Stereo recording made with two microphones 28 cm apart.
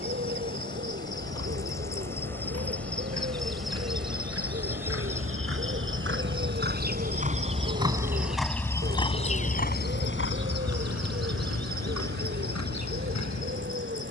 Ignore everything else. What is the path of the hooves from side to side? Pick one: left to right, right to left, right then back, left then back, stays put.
right to left.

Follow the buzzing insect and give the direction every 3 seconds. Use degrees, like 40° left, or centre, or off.
10° left, 10° right, 30° right, 40° right, 50° right.